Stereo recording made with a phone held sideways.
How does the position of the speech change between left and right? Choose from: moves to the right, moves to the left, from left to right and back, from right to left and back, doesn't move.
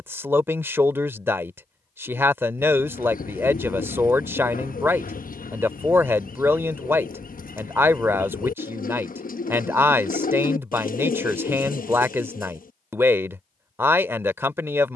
doesn't move.